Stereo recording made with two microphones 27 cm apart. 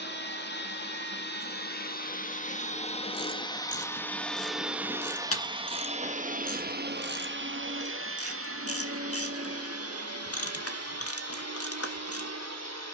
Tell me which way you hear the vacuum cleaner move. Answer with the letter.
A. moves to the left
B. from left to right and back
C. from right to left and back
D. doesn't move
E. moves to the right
E.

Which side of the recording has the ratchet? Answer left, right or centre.
left.